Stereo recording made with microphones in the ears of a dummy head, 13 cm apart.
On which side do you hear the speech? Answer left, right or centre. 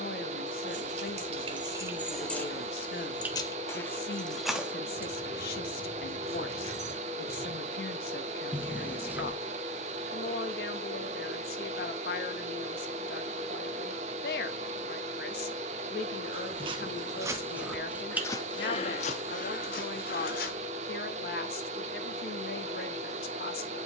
left.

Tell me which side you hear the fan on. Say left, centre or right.
right.